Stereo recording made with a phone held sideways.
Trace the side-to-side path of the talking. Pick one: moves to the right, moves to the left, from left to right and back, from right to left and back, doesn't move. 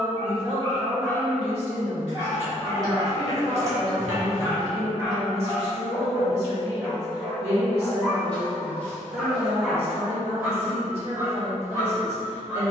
doesn't move.